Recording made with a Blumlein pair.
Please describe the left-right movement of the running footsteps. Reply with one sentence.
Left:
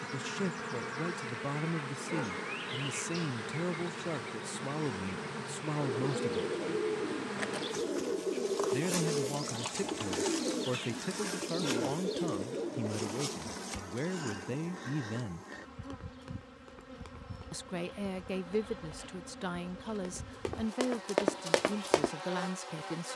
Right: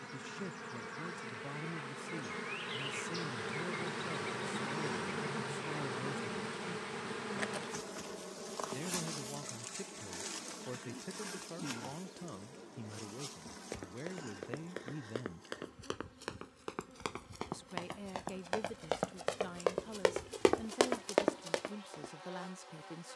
You can hear the running footsteps go from the right side to the left.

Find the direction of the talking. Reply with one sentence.
In this clip you hear the talking on the left.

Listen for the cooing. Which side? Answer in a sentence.
You can hear the cooing on the left.